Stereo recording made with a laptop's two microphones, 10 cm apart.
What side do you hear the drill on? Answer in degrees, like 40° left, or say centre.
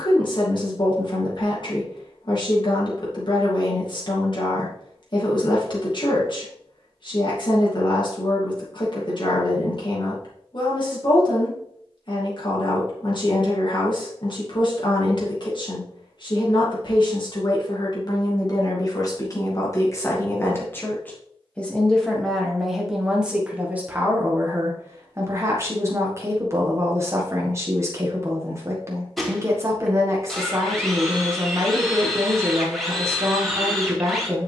centre.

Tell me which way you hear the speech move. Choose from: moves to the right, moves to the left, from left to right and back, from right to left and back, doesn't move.
moves to the right.